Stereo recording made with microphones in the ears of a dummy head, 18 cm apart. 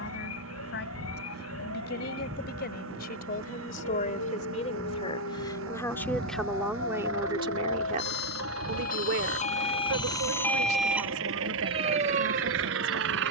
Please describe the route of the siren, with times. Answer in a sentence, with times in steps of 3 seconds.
You can hear the siren on the left from 0 s, in the centre from 9 s and on the right from 12 s.